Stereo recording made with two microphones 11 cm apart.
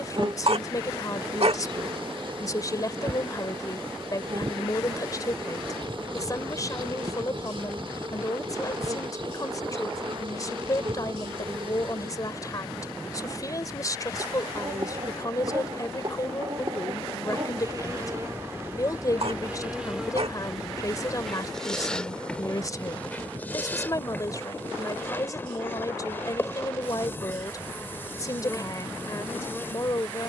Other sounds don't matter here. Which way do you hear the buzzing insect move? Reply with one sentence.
In this clip you hear the buzzing insect go from the right side to the left.